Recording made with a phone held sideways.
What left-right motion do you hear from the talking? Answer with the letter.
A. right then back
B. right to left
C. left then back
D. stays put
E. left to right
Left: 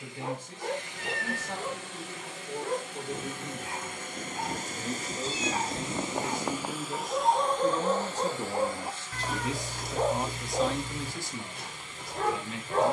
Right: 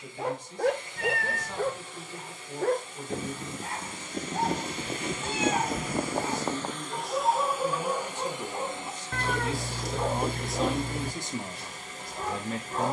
E.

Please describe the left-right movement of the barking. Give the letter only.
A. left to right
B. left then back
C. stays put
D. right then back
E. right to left
E.